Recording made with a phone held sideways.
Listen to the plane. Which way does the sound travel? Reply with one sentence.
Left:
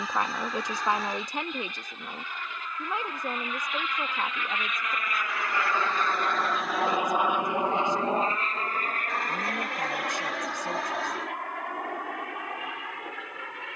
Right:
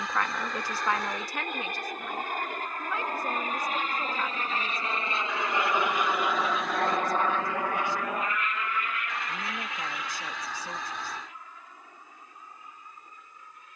In this clip you hear the plane travel towards the left.